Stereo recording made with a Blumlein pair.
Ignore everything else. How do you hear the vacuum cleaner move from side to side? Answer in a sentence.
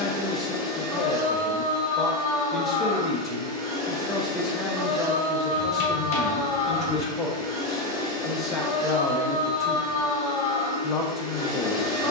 You can hear the vacuum cleaner stay put.